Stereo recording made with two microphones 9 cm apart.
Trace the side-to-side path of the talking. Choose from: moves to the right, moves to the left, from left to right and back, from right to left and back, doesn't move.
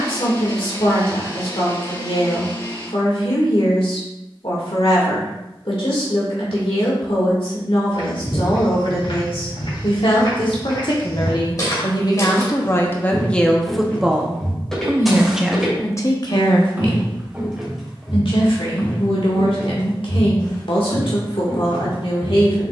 from left to right and back.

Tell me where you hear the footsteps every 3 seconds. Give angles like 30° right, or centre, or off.
off, off, 70° left, 50° left, 20° left, 10° right, 30° left, 60° left.